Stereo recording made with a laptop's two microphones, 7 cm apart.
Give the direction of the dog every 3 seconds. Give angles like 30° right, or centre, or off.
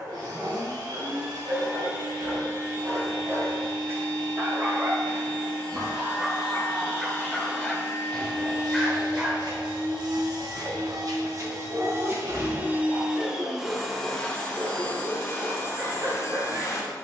40° right, 30° right, centre, 20° right, 50° right, 50° right.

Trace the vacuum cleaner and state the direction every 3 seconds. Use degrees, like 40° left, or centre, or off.
80° right, 80° right, 80° right, 60° right, 10° right, 40° left.